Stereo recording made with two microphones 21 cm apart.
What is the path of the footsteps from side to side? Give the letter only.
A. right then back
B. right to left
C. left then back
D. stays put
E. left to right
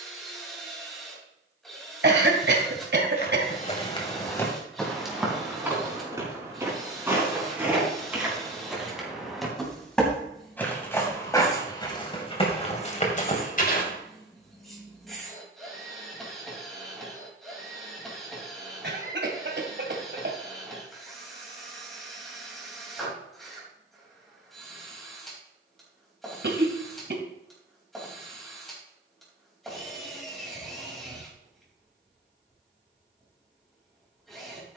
A.